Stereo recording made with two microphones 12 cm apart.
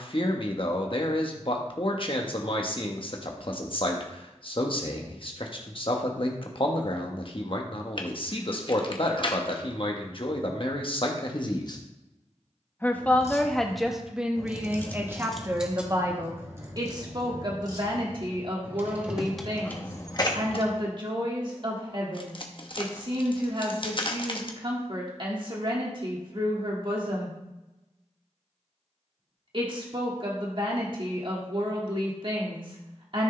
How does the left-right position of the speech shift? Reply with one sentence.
In this clip you hear the speech go from the left side to the right.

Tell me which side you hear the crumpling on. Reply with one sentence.
You can hear the crumpling on the left.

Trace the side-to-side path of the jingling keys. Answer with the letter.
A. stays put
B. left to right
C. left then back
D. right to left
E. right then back
E.